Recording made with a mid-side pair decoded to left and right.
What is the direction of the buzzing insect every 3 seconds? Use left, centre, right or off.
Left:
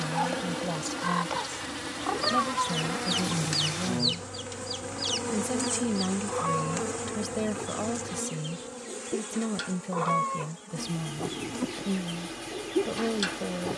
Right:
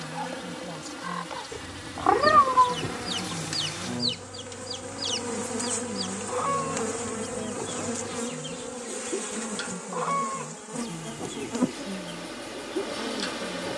left, centre, right, right, right.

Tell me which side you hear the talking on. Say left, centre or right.
left.